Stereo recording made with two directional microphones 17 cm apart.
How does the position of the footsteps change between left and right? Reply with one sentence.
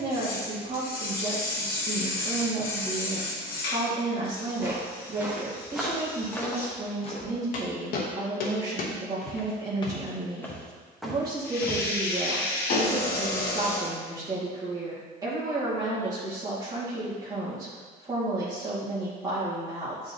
In this clip you hear the footsteps move from right to left and back again.